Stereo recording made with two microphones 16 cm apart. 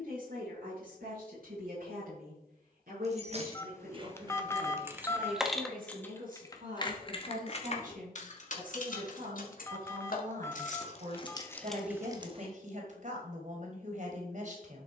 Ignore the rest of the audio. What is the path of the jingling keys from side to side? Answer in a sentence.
In this clip you hear the jingling keys go left and come back.